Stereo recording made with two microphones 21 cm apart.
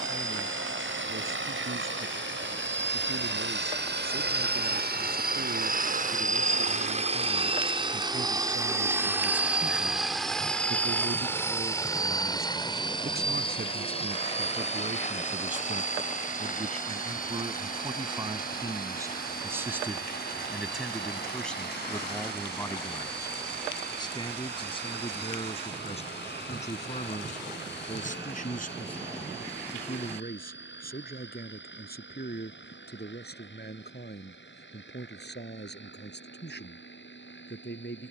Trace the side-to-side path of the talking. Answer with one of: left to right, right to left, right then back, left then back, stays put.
right to left.